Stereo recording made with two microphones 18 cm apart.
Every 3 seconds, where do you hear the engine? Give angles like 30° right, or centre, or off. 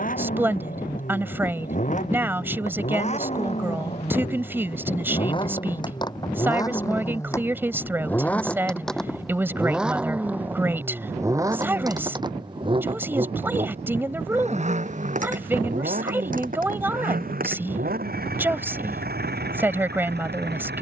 40° left, 30° left, 10° left, 10° right, 30° right, 50° right, 60° right.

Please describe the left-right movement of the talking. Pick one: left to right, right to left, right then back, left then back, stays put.
stays put.